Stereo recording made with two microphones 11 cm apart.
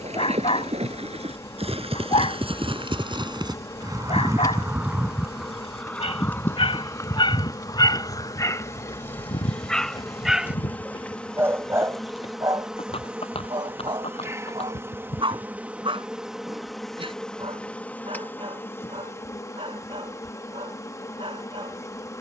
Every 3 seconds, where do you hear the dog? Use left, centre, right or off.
left, left, left, centre, right, right, right, right.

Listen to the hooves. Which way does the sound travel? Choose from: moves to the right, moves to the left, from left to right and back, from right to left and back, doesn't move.
moves to the left.